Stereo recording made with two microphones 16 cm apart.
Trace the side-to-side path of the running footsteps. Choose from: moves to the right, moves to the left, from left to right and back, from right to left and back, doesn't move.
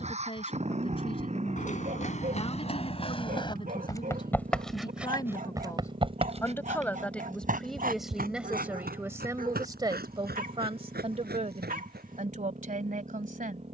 moves to the right.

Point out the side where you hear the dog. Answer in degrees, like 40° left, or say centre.
60° right.